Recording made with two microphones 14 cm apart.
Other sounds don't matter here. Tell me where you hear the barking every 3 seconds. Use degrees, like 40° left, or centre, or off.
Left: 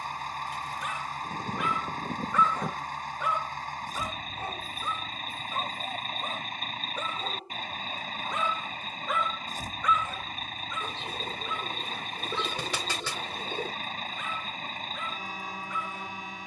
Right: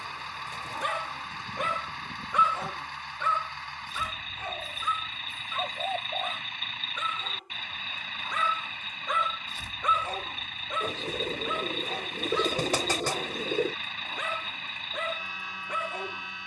40° right, 30° left, 30° left, 50° right, 80° right, 80° right.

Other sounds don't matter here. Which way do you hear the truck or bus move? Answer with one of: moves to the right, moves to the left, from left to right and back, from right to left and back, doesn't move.
doesn't move.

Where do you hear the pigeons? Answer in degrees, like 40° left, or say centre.
40° right.